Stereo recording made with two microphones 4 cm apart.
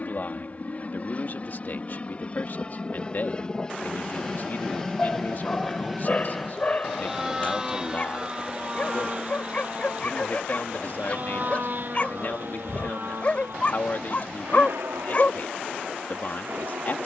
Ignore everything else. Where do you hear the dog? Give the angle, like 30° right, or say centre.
30° left.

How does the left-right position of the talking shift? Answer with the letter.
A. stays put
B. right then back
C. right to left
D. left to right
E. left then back
A.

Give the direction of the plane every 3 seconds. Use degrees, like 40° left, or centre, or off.
40° left, 10° left, 10° right, 40° right, 50° right, 60° right.